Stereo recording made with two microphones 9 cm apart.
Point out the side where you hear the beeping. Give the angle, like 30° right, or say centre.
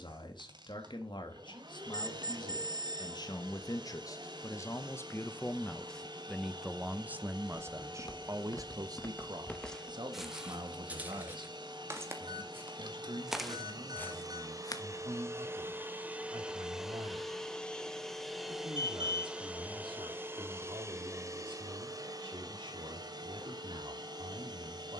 60° right.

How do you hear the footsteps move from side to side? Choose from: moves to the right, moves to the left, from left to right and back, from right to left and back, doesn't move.
from left to right and back.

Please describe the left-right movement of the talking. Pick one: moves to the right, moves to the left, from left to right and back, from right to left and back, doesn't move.
moves to the right.